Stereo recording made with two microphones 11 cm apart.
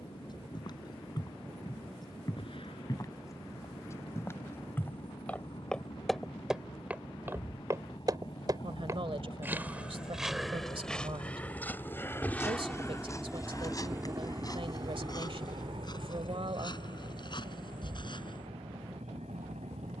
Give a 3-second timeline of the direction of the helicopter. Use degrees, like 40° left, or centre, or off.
70° left, 60° left, 60° left, 40° left, 10° right, 60° right, 80° right.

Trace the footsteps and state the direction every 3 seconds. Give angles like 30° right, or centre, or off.
40° left, 20° left, 20° right, centre, 30° left, 40° left, 50° left.